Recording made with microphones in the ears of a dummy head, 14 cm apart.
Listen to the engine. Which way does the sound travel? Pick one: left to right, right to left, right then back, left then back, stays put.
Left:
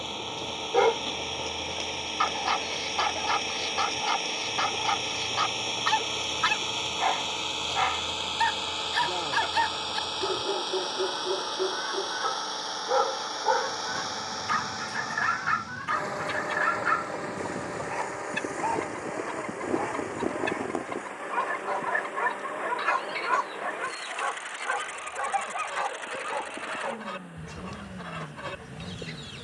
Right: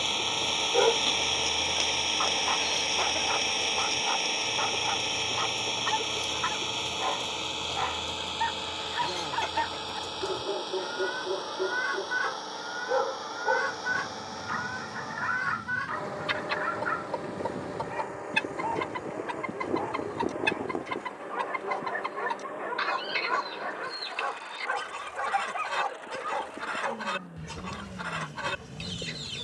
right to left.